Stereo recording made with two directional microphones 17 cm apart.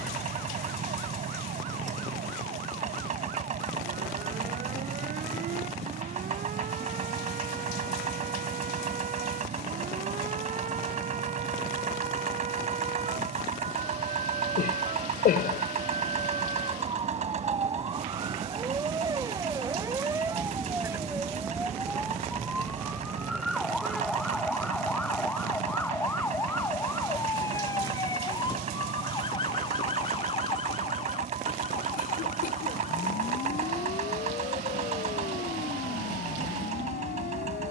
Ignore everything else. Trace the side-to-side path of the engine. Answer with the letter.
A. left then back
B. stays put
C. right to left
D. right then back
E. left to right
B.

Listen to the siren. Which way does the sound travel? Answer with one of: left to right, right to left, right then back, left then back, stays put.
right to left.